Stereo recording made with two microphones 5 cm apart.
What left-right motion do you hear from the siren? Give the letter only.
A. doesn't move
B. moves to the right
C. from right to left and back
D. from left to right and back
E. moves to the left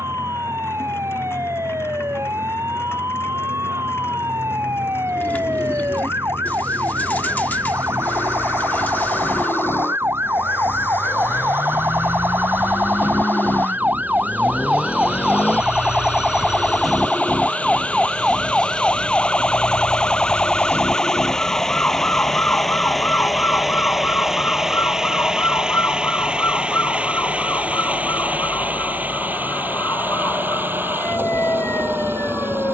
E.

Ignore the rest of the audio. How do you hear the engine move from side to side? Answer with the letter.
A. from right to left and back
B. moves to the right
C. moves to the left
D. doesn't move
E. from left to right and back
B.